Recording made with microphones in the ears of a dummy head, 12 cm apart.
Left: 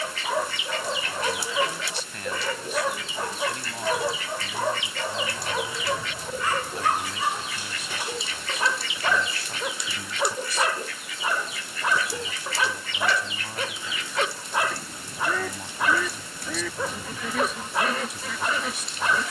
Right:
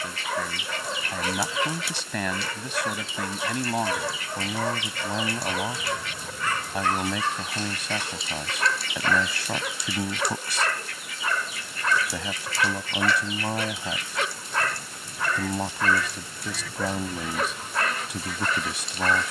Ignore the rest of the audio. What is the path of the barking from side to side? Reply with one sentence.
You can hear the barking stay put.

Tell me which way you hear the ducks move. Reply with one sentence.
In this clip you hear the ducks stay put.